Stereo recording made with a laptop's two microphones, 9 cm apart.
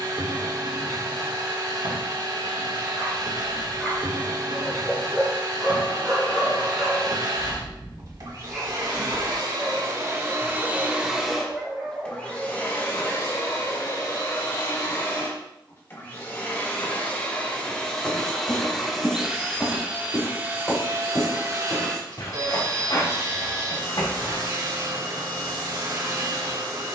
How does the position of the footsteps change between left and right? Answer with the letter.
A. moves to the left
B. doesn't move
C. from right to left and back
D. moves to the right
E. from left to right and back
A.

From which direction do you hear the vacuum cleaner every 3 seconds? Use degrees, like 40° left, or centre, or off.
50° right, 50° right, 50° right, 30° right, 30° left, 20° left, 10° right, 40° right, 50° right.